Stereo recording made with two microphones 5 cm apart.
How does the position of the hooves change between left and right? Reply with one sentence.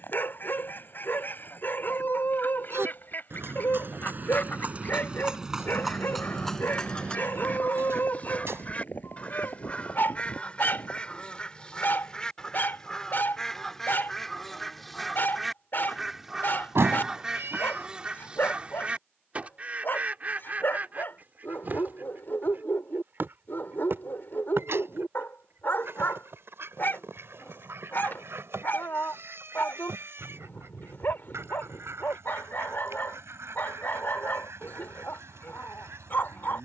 You can hear the hooves move from right to left.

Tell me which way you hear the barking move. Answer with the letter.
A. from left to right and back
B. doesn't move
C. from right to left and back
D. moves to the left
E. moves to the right
B.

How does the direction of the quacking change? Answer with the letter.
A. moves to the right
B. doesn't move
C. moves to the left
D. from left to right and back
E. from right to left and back
A.